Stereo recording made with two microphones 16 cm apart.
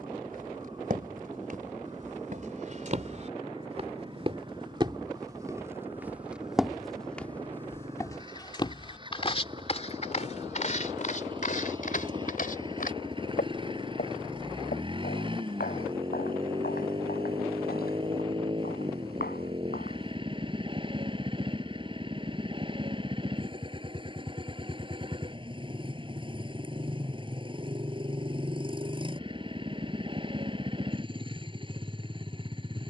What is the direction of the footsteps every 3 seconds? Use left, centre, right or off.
right, right, centre, left, left, left, left, off, off, off, off.